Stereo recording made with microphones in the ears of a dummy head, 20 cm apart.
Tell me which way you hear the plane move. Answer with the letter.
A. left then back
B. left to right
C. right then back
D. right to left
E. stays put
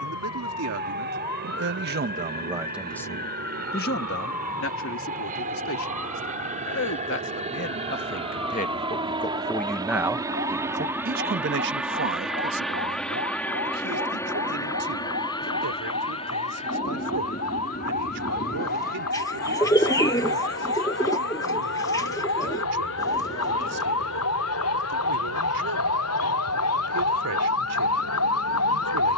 D.